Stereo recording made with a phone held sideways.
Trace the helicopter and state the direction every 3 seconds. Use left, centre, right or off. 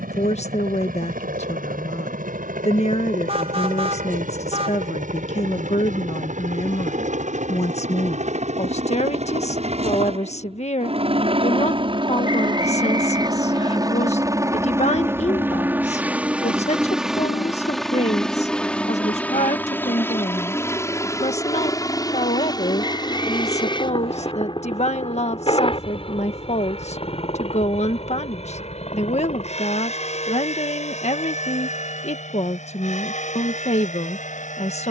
right, right, right, right, right, centre, centre, left, left, left, left, left.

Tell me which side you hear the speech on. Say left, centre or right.
left.